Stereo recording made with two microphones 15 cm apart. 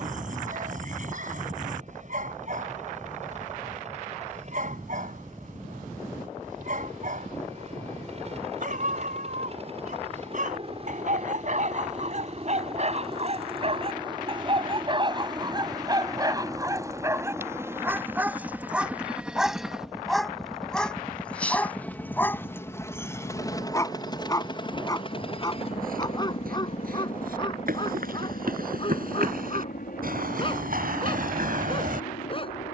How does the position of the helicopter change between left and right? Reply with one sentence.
You can hear the helicopter go from the right side to the left.